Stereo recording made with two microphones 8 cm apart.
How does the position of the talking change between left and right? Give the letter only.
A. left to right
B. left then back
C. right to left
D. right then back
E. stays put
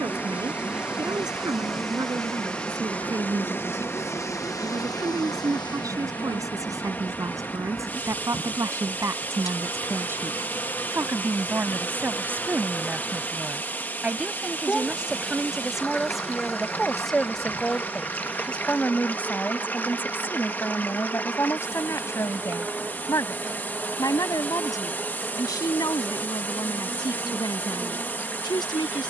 C.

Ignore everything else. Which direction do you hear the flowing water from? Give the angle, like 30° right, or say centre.
20° left.